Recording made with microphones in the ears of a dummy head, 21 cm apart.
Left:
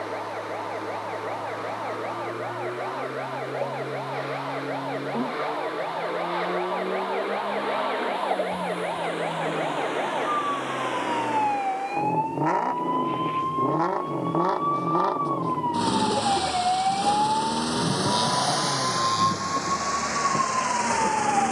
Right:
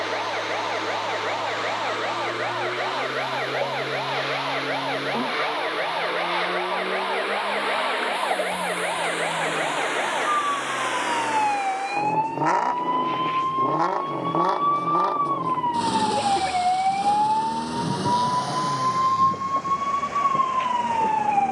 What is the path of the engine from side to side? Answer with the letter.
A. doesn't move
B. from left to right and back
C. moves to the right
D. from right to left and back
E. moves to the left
E.